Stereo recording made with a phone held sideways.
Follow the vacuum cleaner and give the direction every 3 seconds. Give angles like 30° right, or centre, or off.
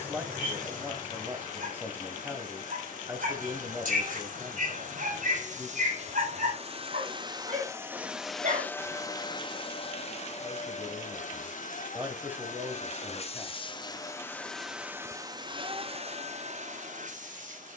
70° right, 60° right, 20° right, 50° left, 30° left, 50° right.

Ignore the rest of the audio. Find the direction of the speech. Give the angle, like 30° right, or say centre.
10° right.